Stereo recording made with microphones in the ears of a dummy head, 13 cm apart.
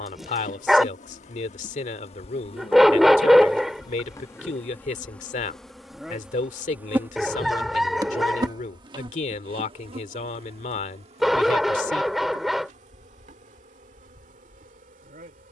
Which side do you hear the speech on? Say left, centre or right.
left.